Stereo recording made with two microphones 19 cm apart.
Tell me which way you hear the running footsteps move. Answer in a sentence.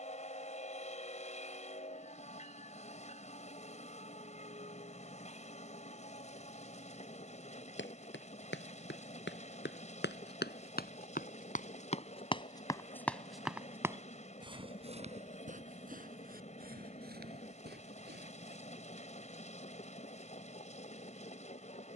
You can hear the running footsteps move to the right.